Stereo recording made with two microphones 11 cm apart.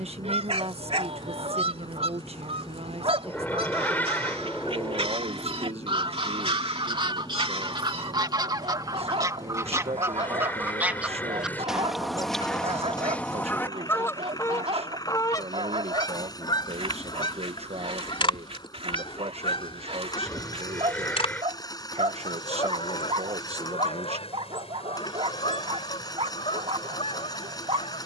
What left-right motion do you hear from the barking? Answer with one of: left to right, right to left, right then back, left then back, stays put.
stays put.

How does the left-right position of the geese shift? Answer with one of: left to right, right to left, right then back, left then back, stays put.
right to left.